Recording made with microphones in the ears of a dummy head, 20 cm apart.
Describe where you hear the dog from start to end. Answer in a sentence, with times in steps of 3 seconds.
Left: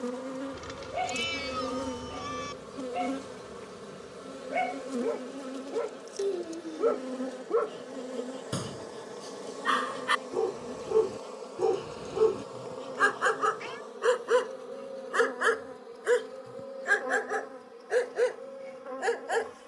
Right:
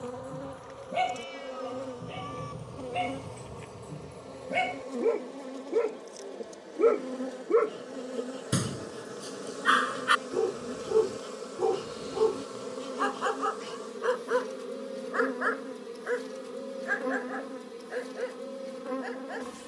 You can hear the dog on the right from 0 s, in the centre from 9 s and on the left from 12 s.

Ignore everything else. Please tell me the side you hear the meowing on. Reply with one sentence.
In this clip you hear the meowing on the left.